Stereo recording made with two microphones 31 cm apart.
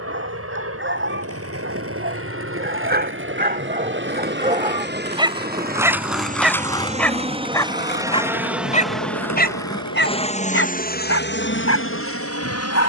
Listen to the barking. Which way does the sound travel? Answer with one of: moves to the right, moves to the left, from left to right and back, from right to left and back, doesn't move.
moves to the left.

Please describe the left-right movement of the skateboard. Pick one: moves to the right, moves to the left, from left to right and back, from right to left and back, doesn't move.
moves to the left.